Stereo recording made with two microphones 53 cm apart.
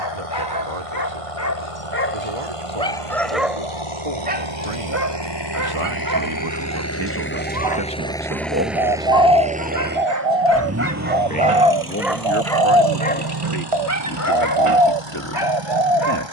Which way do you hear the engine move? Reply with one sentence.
You can hear the engine travel towards the right.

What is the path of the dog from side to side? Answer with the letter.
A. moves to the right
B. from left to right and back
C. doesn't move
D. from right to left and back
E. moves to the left
B.